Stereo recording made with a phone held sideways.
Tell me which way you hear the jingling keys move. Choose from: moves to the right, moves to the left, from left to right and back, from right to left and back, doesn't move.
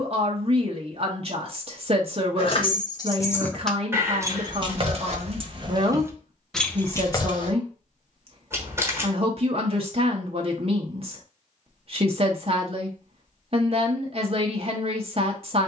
from left to right and back.